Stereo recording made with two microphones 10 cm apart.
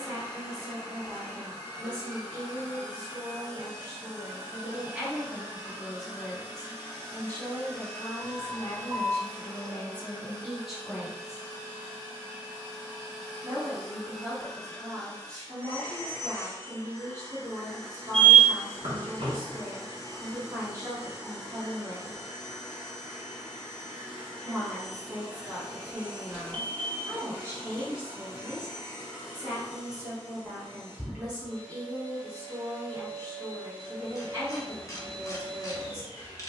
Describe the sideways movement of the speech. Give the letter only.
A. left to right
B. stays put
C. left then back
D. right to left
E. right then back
C.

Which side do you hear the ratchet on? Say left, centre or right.
left.